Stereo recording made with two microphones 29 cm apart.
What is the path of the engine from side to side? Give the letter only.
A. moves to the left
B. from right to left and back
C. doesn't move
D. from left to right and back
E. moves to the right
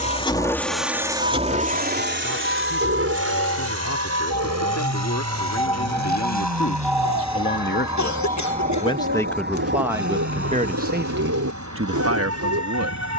E.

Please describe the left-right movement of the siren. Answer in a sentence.
You can hear the siren go from the left side to the right.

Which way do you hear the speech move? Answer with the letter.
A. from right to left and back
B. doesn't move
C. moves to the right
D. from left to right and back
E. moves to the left
C.